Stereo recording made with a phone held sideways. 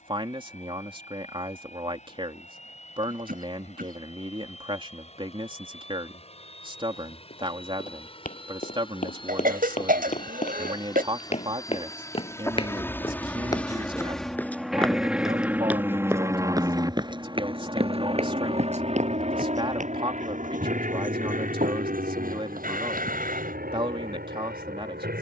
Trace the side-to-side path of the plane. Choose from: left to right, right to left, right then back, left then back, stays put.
left to right.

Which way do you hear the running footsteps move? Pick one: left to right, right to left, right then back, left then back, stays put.
left to right.